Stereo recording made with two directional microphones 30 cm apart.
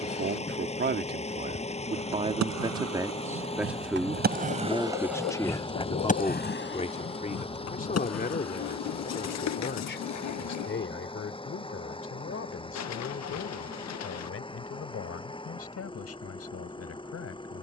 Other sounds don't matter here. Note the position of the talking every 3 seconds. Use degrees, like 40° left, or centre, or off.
30° right, centre, 30° left, 40° left, 50° left, 50° left.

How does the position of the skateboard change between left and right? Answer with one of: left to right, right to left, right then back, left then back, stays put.
right to left.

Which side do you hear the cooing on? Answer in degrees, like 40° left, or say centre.
60° left.